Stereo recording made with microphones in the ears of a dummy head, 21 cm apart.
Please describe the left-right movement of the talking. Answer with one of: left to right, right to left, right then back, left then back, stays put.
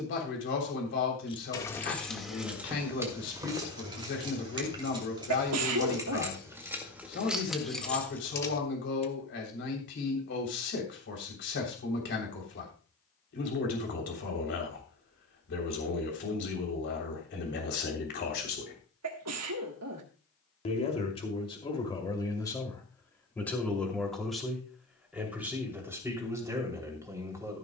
left to right.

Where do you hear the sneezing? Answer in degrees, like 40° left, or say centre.
70° right.